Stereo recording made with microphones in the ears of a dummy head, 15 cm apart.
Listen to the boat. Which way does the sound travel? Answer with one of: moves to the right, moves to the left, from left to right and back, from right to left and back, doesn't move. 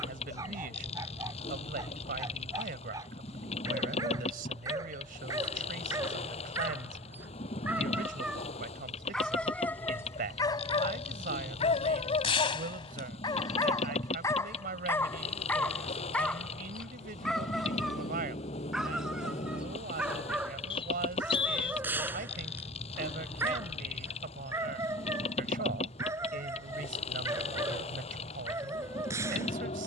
doesn't move.